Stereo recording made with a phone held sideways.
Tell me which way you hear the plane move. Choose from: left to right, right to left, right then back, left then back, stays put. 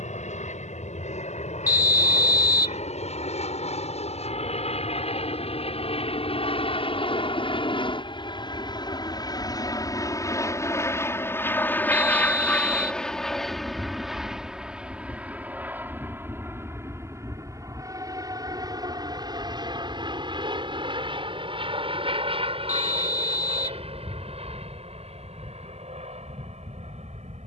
left to right.